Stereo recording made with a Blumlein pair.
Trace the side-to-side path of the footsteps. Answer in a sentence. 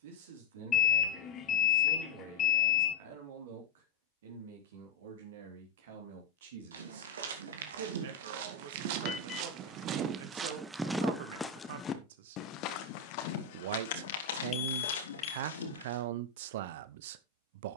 In this clip you hear the footsteps move from right to left.